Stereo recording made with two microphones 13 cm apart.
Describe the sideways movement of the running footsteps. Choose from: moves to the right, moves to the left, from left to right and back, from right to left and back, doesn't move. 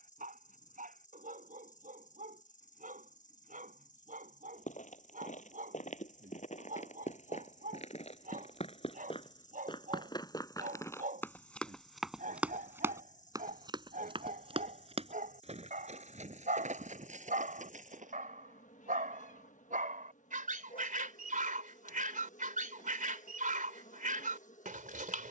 moves to the right.